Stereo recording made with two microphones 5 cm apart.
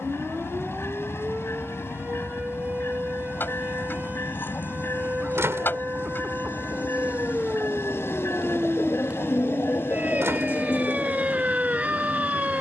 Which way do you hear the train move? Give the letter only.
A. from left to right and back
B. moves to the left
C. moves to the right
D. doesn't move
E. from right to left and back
D.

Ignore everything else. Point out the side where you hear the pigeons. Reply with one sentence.
You can hear the pigeons on the left.